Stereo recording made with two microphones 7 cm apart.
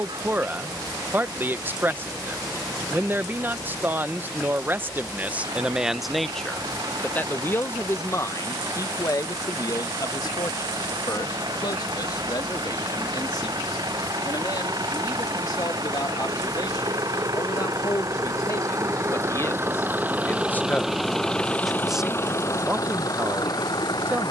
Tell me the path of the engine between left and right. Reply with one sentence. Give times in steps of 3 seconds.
In this clip you hear the engine on the right from 0 s and on the left from 21 s.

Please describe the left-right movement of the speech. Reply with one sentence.
You can hear the speech go left and come back.